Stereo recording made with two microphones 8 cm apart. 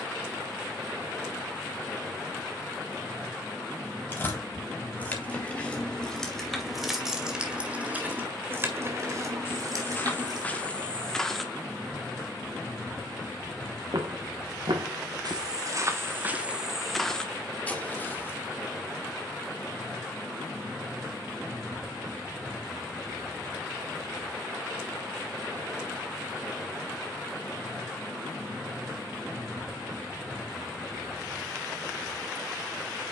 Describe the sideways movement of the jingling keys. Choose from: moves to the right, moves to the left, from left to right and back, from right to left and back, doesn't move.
moves to the right.